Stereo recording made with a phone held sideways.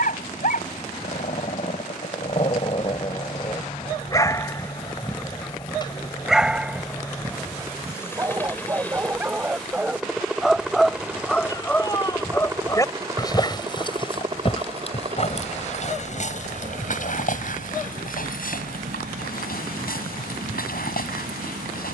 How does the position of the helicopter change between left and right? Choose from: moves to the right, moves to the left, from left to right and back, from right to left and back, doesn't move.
moves to the right.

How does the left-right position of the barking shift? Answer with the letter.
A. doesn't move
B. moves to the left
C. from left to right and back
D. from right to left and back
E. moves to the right
C.